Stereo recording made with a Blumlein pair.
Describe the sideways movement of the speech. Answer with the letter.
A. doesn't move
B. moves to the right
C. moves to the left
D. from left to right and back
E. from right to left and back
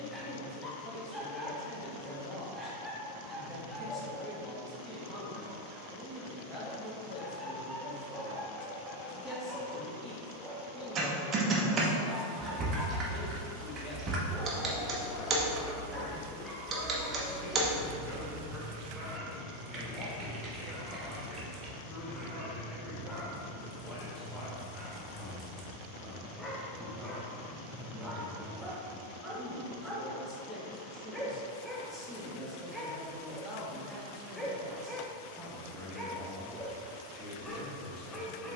A.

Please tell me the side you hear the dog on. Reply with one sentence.
You can hear the dog in the centre.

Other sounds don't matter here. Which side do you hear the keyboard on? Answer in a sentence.
In this clip you hear the keyboard on the right.